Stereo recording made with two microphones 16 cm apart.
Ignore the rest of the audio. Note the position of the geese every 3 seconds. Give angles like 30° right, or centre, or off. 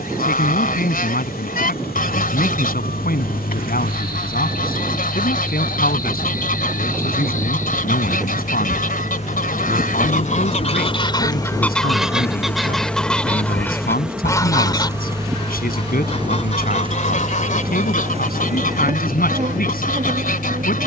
70° left, 70° left, 70° left, 40° left, 10° left, 50° left, 60° left.